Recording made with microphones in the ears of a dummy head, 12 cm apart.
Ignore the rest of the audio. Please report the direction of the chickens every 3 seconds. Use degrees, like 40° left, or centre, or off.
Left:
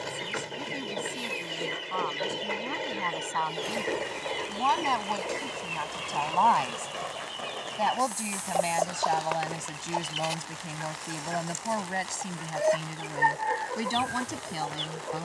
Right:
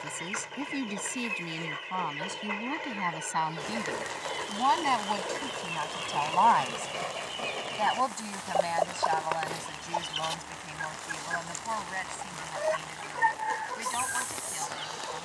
40° left, 20° left, centre, 10° left, 40° left.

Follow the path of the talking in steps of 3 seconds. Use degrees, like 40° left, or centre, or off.
20° right, 10° right, 20° left, 40° left, 60° left.